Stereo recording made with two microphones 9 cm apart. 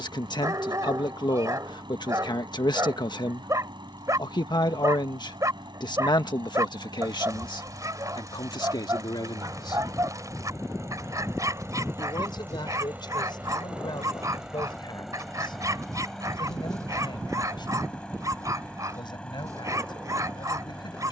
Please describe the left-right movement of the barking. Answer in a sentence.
You can hear the barking stay in one place.